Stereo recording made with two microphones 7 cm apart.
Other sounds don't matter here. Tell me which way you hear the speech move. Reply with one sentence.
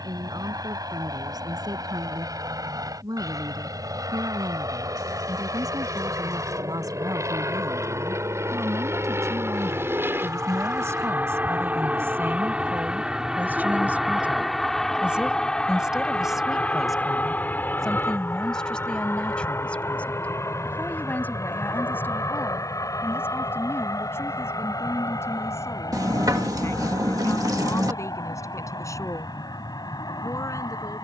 You can hear the speech go from the right side to the left.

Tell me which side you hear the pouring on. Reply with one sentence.
You can hear the pouring on the right.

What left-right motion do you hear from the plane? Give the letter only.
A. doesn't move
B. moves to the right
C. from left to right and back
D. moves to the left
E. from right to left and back
D.